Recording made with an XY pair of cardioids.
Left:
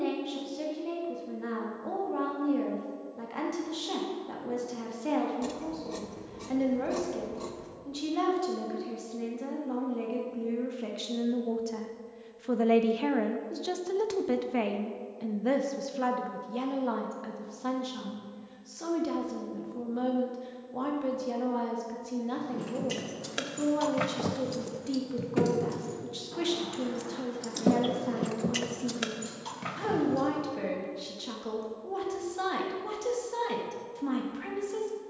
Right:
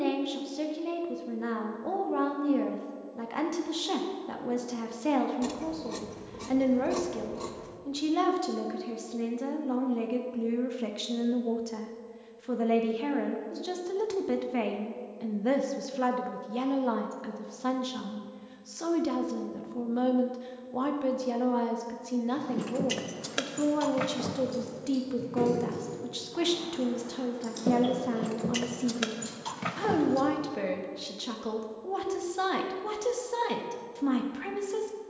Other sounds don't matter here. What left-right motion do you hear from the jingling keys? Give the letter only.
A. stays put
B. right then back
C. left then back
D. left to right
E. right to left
C.